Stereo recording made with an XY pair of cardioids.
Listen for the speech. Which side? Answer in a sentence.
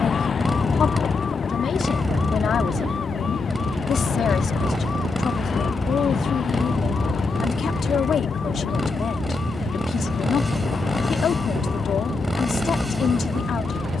In this clip you hear the speech on the left.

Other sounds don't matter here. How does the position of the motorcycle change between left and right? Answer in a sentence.
You can hear the motorcycle stay put.